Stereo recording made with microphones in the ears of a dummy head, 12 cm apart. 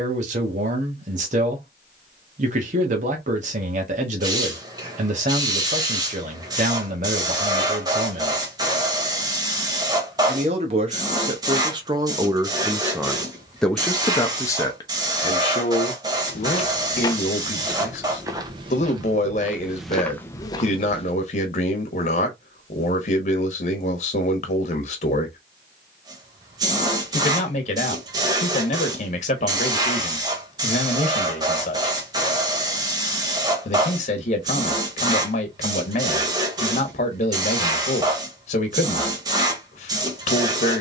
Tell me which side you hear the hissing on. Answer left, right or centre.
right.